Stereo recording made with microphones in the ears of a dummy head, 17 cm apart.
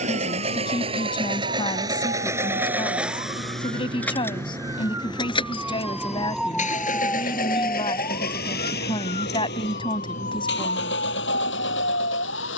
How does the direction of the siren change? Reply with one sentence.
In this clip you hear the siren go from the right side to the left.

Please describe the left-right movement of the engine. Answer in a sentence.
You can hear the engine go from the right side to the left.